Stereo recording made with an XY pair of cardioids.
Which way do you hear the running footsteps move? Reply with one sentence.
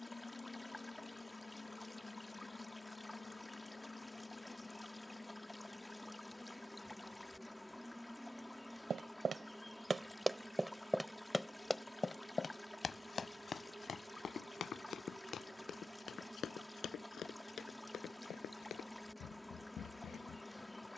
In this clip you hear the running footsteps travel towards the left.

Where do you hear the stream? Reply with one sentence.
You can hear the stream in the centre.